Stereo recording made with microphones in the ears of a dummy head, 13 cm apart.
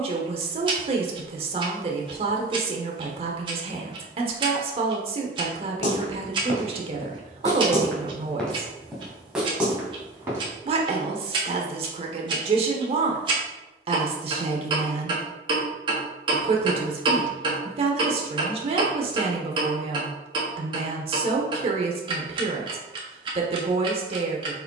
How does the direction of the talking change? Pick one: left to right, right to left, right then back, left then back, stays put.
stays put.